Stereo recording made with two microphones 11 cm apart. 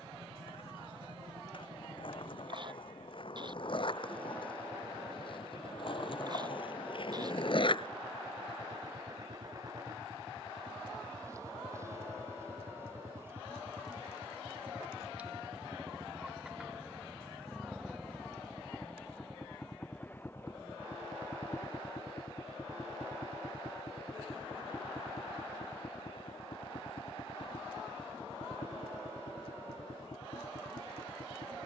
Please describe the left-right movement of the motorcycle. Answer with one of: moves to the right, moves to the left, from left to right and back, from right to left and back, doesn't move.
moves to the left.